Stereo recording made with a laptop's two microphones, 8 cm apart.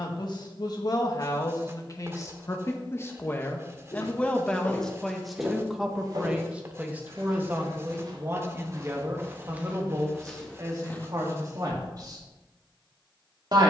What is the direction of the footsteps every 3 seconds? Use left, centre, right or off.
off, centre, right, centre, off.